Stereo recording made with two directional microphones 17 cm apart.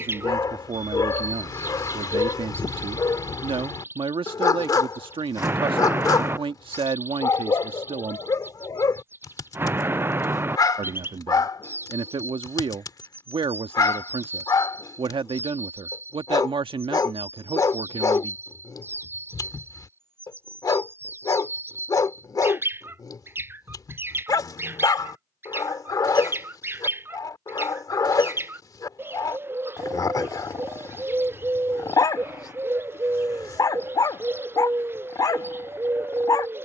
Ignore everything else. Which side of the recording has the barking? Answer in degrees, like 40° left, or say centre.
20° left.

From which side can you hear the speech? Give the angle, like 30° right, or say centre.
30° right.